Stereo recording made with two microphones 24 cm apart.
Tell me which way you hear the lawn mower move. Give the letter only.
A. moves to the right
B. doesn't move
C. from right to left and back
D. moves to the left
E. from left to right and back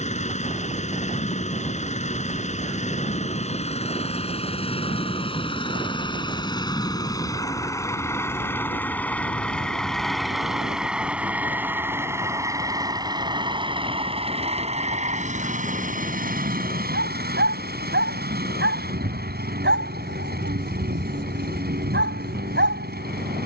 A.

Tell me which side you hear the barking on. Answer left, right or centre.
right.